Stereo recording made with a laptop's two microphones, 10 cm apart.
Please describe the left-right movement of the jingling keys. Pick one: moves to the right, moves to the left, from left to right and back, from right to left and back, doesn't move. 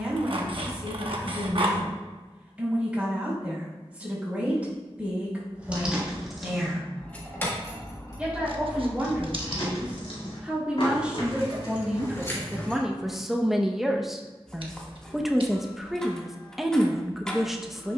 from right to left and back.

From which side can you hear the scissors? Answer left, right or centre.
right.